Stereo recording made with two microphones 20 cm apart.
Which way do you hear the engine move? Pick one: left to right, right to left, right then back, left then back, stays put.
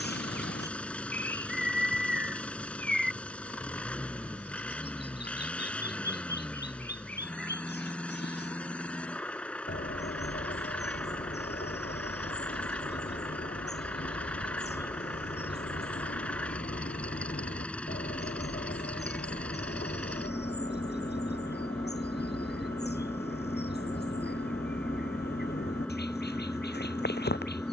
stays put.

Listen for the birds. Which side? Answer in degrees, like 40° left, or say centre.
60° left.